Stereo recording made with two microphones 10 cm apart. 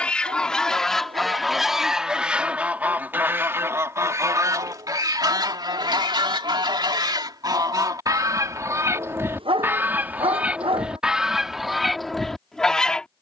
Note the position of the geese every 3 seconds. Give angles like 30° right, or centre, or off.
centre, 40° right, 40° right, 10° right, 10° left.